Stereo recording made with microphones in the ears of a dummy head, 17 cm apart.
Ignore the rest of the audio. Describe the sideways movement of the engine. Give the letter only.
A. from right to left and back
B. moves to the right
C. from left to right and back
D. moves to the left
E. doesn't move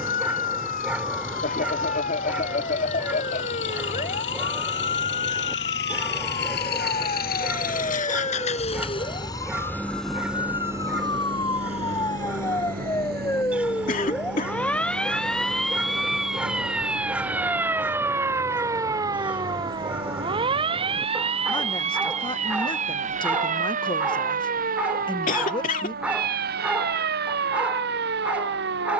B.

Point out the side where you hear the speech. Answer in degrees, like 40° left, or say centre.
30° left.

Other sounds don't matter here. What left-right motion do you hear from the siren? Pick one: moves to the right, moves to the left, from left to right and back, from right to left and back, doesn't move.
moves to the right.